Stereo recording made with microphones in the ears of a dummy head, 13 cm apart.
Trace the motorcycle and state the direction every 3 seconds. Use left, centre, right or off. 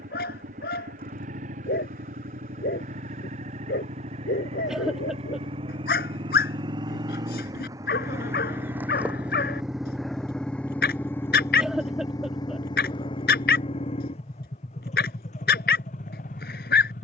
right, right, right, centre, left, left.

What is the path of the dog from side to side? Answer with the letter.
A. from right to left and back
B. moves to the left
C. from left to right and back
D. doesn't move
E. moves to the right
D.